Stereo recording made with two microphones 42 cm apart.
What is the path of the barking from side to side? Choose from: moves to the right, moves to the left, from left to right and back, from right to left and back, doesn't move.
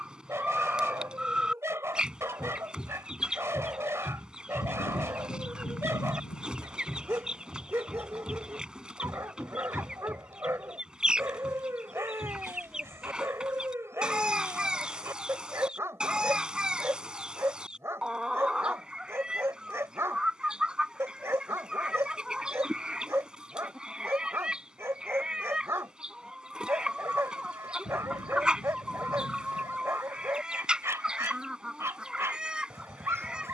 doesn't move.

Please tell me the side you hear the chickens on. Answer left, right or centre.
centre.